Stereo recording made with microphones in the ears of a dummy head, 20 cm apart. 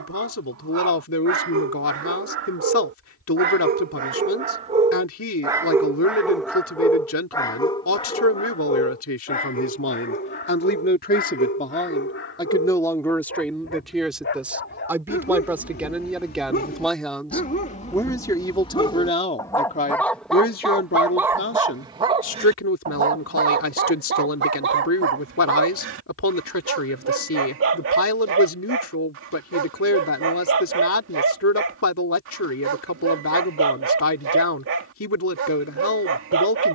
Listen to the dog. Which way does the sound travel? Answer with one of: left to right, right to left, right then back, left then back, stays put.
left then back.